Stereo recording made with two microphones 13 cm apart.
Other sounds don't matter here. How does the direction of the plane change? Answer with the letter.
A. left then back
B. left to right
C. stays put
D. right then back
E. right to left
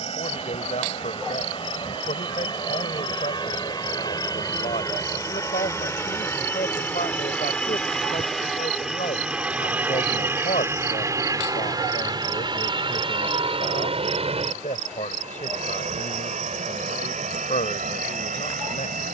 B.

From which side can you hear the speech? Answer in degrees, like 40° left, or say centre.
70° left.